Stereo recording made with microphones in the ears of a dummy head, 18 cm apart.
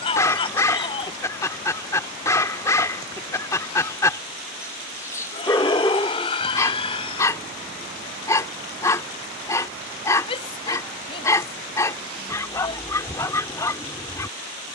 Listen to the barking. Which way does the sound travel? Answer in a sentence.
In this clip you hear the barking stay put.